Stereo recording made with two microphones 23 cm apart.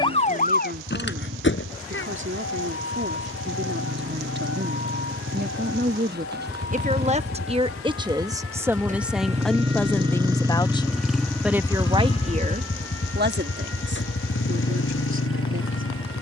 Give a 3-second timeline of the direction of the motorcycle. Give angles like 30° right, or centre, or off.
60° right, 60° right, 40° right, 10° right, 50° left, 80° left.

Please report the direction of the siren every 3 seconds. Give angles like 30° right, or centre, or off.
50° left, 70° left, 80° left, 80° left, 80° left, 80° left.